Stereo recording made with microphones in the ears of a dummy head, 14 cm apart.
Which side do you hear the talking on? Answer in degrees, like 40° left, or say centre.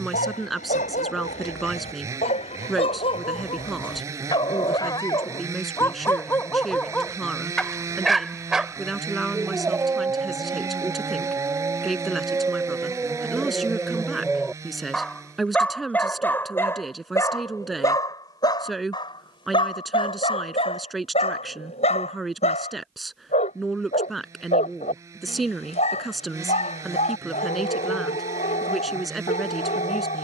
centre.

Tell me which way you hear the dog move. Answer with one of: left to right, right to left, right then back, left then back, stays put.
right then back.